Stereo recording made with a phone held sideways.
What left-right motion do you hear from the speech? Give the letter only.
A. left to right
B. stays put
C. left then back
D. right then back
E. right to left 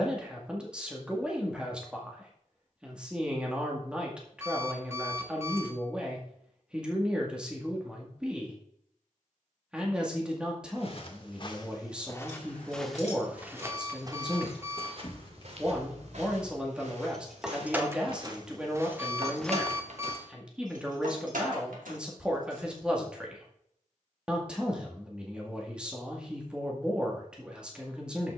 B.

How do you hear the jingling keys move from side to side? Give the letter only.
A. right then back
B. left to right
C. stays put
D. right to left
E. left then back
B.